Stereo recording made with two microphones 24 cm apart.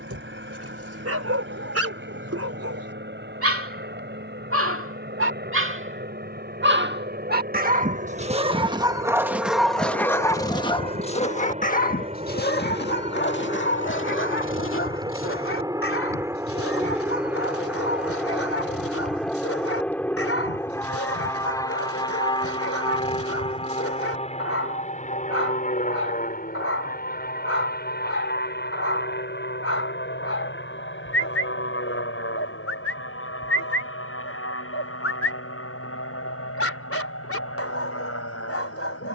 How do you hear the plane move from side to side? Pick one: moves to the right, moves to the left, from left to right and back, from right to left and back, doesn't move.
moves to the left.